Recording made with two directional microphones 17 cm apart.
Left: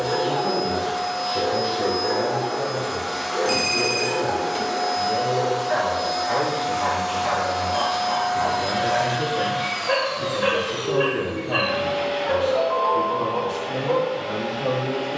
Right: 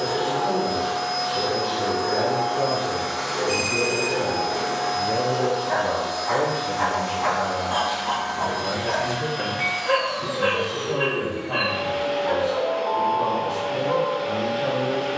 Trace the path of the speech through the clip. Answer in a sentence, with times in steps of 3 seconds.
In this clip you hear the speech in the centre from 0 s, on the right from 3 s, in the centre from 6 s and on the left from 9 s.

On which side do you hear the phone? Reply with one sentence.
You can hear the phone on the left.